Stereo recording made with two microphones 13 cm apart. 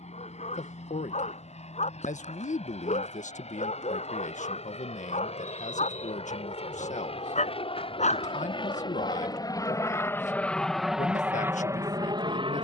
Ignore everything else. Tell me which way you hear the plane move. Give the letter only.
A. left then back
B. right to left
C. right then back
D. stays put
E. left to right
E.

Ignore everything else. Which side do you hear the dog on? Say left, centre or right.
left.